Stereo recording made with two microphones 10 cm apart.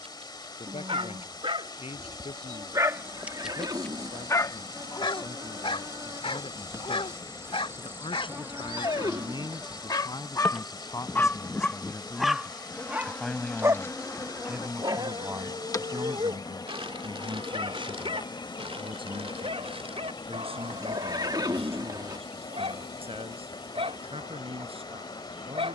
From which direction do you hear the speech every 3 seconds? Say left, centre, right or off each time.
left, left, left, left, centre, right, right, right, right.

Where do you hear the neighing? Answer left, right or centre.
right.